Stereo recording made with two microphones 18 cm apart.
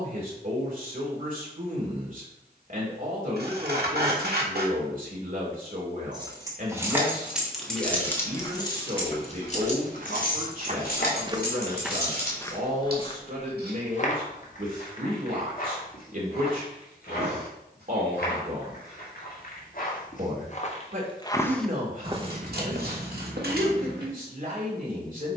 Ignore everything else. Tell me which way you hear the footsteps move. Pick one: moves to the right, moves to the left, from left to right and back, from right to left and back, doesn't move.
from right to left and back.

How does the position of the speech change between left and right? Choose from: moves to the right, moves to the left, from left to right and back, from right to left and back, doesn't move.
doesn't move.